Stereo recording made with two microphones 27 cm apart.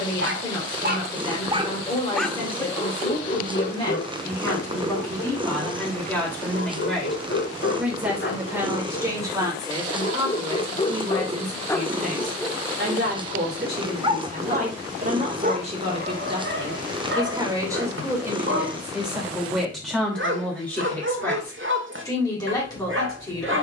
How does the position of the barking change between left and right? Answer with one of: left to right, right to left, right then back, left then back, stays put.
left then back.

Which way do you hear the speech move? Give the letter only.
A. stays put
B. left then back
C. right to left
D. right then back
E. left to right
D.